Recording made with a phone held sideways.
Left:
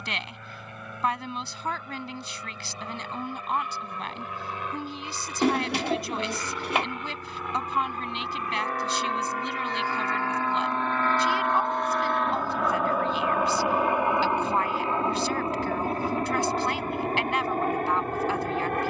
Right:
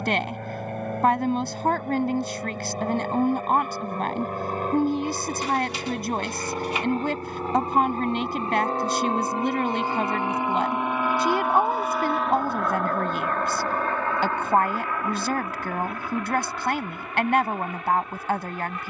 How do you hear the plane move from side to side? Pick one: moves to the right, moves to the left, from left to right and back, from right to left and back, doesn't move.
moves to the left.